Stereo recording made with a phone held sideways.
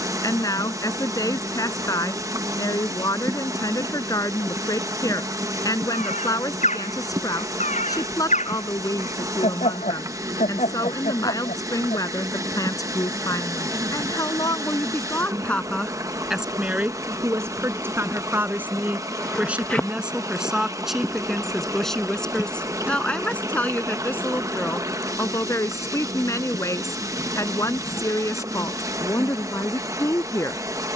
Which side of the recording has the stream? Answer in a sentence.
In this clip you hear the stream on the right.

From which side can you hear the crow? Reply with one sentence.
You can hear the crow on the left.